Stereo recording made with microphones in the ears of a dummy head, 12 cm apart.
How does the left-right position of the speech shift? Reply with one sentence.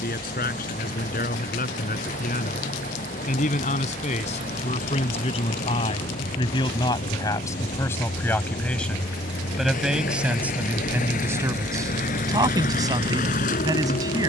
In this clip you hear the speech travel towards the right.